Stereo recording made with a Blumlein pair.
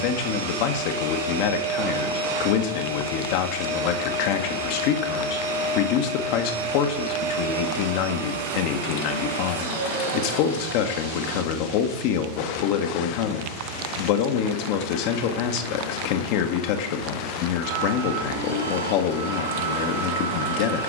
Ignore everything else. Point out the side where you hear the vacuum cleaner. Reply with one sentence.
In this clip you hear the vacuum cleaner on the right.